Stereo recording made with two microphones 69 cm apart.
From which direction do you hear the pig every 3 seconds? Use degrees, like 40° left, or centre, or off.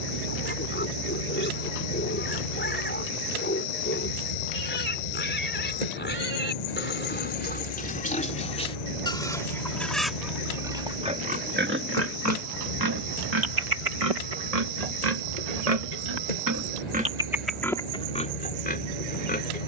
20° left, 20° left, 10° left, centre, 50° right, 30° right, 10° left.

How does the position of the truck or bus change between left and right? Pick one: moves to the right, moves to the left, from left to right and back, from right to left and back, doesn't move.
doesn't move.